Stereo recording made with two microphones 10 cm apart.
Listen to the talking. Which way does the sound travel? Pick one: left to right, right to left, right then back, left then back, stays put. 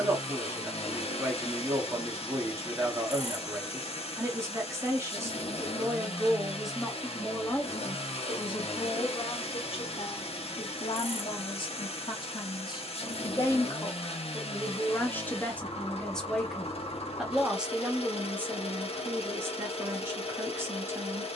left then back.